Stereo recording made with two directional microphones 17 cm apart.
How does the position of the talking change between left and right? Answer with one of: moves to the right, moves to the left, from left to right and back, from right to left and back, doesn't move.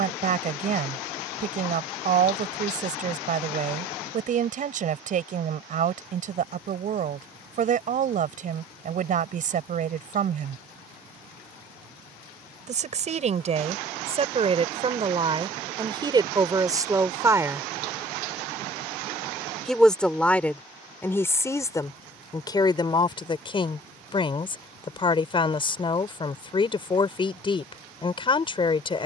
moves to the left.